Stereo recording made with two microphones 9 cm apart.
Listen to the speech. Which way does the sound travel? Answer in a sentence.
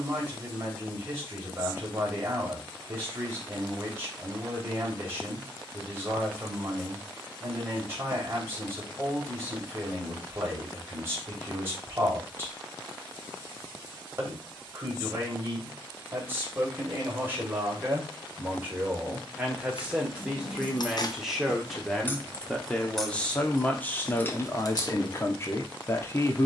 You can hear the speech move to the left.